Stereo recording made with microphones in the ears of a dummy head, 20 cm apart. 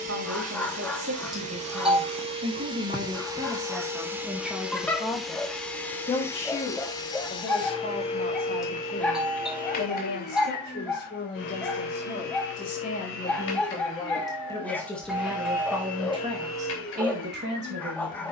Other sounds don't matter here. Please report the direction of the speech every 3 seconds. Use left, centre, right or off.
right, centre, left, left, left, right.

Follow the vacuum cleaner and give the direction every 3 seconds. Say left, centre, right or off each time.
right, centre, left, left, left, left.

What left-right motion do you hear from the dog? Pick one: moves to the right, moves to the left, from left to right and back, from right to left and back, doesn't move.
doesn't move.